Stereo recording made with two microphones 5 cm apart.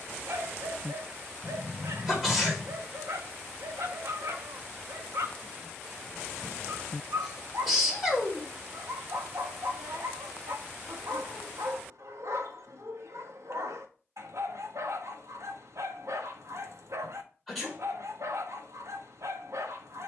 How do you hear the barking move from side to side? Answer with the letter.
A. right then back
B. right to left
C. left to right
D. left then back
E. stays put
E.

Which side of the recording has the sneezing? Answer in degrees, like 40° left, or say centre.
centre.